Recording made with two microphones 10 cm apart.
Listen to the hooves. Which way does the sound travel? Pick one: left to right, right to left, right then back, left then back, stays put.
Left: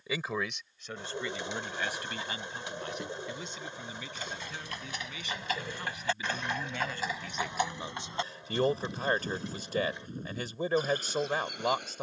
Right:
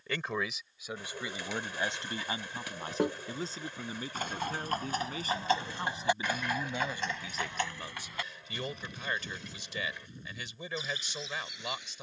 right to left.